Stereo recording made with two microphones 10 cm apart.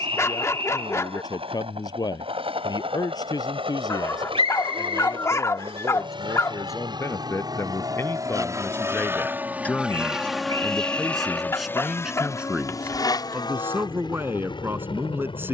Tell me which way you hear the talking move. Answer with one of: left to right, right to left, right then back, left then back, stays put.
left to right.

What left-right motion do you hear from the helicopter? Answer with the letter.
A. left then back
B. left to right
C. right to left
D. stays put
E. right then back
C.